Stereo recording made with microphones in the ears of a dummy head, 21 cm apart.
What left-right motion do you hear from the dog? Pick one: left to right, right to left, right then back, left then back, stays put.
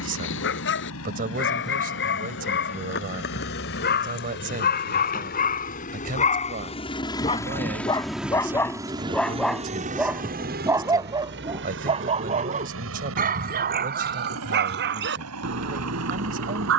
left to right.